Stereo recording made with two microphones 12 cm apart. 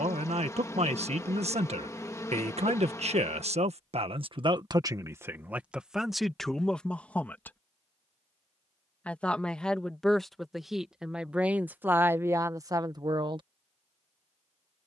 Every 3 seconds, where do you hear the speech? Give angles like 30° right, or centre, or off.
60° right, 40° right, 10° left, centre, 30° right.